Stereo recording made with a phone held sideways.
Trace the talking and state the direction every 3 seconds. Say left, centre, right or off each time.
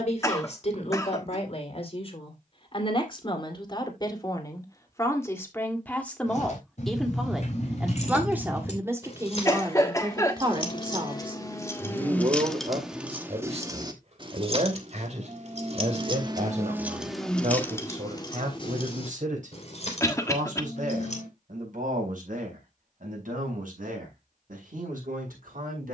left, left, centre, right, right, right, right, right, right.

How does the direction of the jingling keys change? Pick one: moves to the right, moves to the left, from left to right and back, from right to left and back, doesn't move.
from left to right and back.